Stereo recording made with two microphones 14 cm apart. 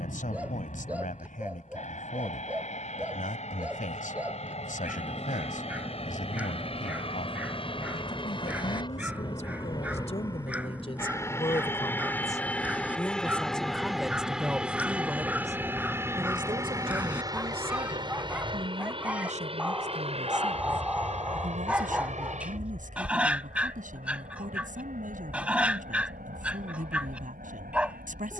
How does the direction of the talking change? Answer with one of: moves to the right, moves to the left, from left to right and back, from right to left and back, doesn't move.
moves to the right.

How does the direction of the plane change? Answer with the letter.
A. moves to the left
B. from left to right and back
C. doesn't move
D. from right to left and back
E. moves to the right
E.